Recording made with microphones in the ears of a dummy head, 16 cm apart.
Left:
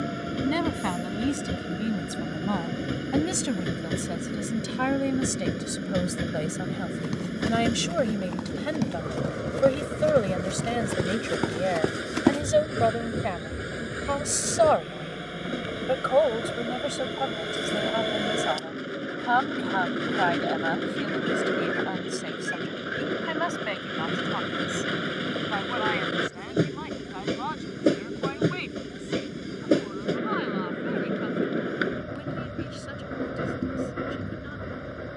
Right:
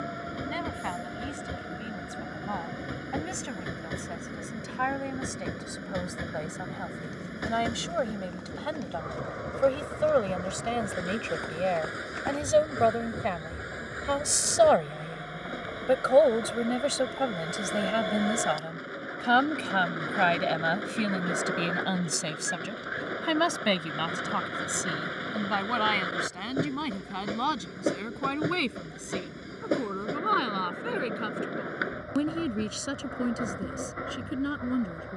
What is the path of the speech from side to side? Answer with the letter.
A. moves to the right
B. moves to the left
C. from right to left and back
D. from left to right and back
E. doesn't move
A.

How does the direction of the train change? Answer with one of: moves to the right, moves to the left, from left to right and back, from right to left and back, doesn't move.
doesn't move.